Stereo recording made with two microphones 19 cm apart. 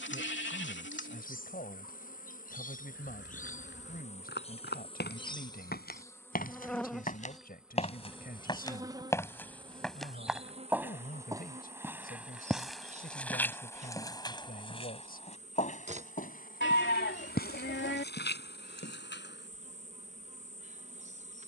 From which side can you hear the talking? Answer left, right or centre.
left.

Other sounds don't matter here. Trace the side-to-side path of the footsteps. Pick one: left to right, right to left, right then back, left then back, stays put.
right then back.